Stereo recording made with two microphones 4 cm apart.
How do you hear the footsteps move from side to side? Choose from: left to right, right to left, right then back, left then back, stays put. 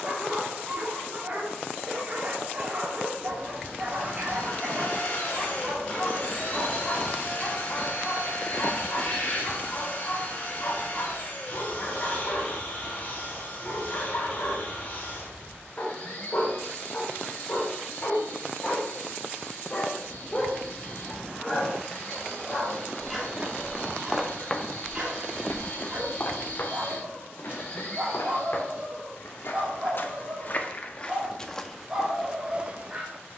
left then back.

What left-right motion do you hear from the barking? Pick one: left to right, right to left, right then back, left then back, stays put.
left then back.